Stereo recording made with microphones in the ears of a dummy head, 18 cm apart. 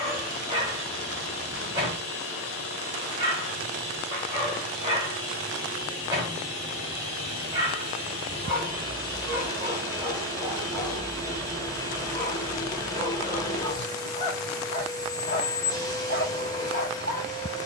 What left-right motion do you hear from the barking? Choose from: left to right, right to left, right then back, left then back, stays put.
right to left.